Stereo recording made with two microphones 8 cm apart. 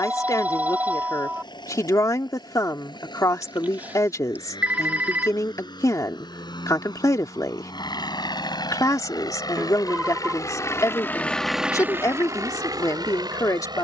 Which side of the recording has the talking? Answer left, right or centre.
left.